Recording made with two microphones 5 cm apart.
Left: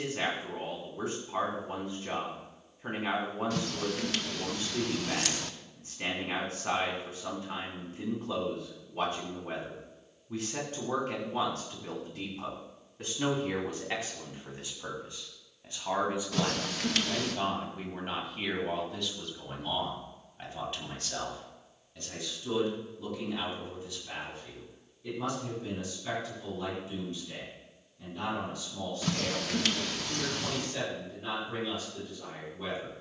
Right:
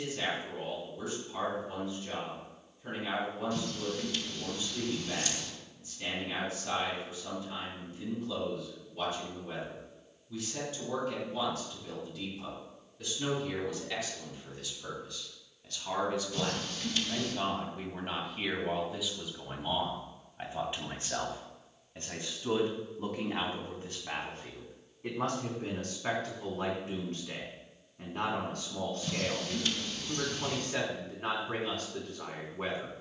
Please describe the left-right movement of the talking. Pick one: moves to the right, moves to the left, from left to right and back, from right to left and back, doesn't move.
moves to the right.